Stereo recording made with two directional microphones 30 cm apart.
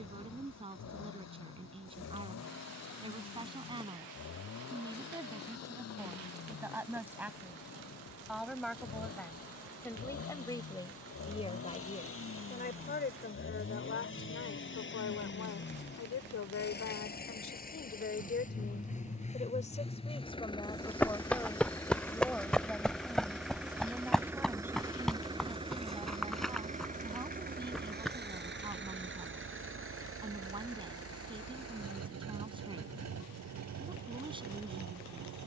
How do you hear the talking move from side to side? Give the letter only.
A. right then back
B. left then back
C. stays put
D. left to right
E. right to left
B.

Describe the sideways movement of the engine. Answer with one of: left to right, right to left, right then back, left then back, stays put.
left to right.